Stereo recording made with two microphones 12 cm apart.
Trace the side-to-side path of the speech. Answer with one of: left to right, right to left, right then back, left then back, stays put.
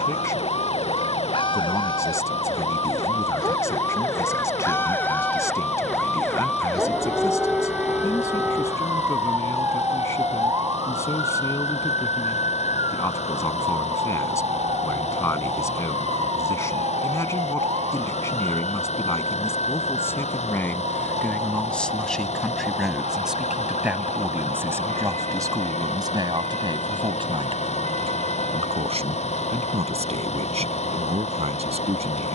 left to right.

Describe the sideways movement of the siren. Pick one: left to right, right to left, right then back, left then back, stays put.
left to right.